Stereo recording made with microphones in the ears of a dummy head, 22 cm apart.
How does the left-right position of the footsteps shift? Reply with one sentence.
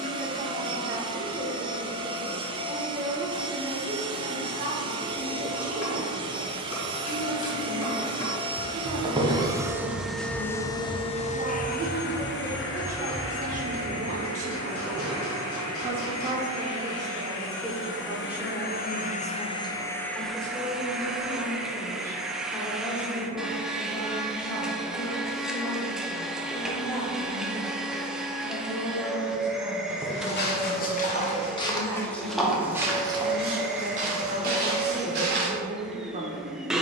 In this clip you hear the footsteps move from left to right.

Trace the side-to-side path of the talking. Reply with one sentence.
You can hear the talking move from right to left and back again.